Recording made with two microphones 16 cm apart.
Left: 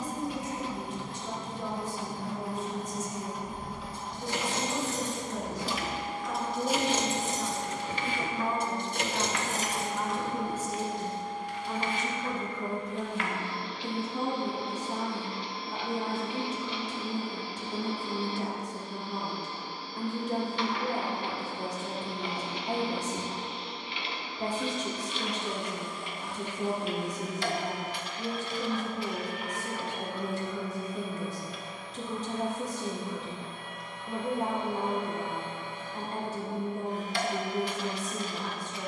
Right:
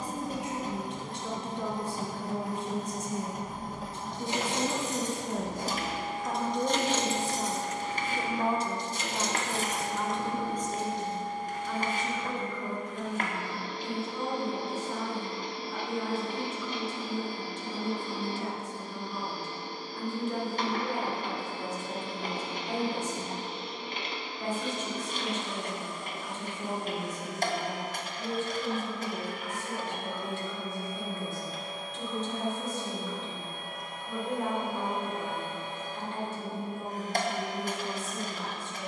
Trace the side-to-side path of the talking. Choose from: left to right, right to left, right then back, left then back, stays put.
right to left.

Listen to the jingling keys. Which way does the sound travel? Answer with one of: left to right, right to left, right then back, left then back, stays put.
left then back.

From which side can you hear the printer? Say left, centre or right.
right.